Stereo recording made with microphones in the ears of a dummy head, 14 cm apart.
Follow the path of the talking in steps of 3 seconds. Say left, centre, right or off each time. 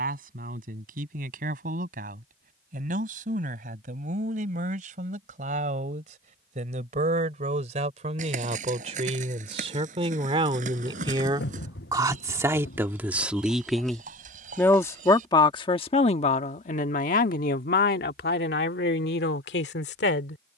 right, right, right, right, centre, left, left.